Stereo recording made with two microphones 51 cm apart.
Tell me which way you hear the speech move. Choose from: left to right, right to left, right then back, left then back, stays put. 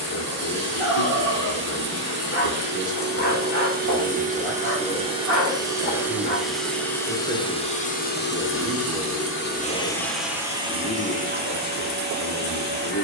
right then back.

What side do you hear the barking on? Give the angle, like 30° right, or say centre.
30° left.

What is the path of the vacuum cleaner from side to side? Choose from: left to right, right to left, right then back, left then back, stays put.
left then back.